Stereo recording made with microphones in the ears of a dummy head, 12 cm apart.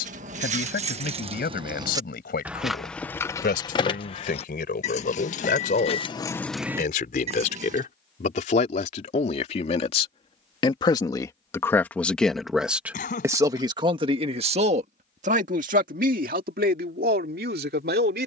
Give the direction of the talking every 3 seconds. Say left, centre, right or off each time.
left, left, left, left, right, right.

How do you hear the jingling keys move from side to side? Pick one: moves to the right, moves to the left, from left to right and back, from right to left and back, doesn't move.
from right to left and back.